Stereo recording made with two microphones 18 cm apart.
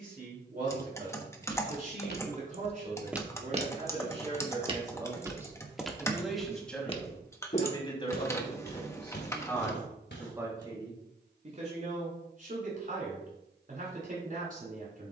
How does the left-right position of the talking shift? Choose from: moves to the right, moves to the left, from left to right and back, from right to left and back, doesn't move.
from right to left and back.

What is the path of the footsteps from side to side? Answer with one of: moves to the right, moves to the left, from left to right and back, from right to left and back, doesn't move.
from left to right and back.